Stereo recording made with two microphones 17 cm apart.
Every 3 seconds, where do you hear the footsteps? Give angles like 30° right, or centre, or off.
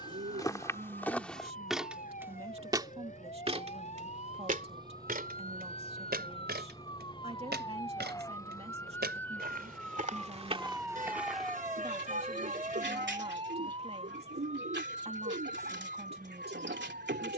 10° left, 50° right, 70° right, 30° right, off, off.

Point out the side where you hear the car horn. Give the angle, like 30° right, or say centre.
50° right.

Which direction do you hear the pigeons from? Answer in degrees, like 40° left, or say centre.
80° right.